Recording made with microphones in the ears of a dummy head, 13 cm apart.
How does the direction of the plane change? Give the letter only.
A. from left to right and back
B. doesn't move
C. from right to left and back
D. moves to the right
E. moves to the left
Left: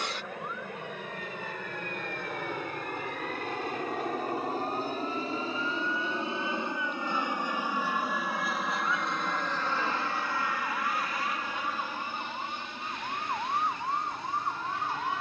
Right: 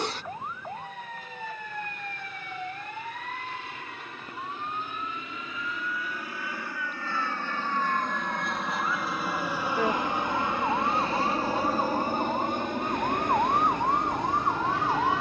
D.